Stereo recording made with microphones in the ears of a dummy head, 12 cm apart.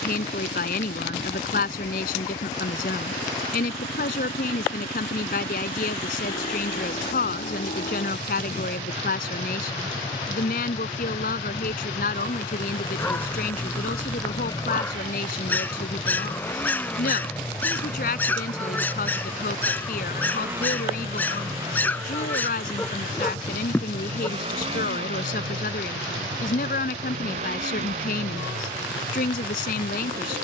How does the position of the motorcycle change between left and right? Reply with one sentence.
You can hear the motorcycle move from left to right.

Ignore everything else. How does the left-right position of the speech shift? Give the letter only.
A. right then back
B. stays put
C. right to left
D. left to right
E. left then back
B.